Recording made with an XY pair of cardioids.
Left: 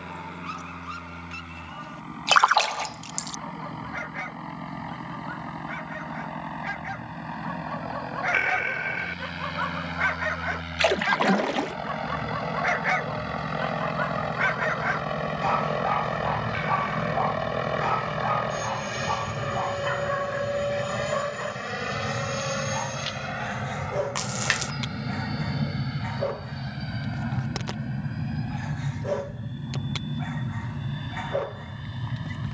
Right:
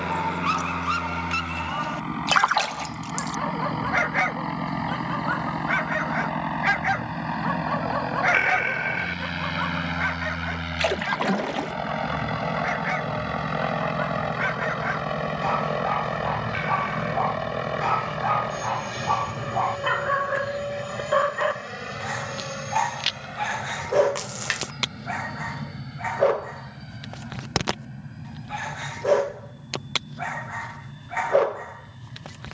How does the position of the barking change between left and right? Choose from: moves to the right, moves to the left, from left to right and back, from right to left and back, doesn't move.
from right to left and back.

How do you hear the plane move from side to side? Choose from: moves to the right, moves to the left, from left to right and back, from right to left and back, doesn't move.
moves to the left.